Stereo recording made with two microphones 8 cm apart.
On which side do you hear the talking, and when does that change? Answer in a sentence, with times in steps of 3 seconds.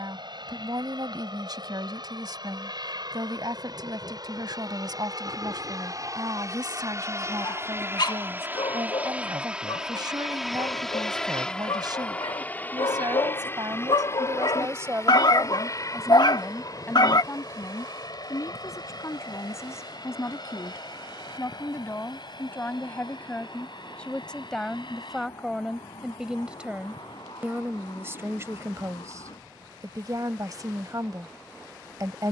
In this clip you hear the talking on the right from 0 s, in the centre from 15 s, on the left from 18 s, in the centre from 24 s and on the right from 27 s.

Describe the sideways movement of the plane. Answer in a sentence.
In this clip you hear the plane move to the left.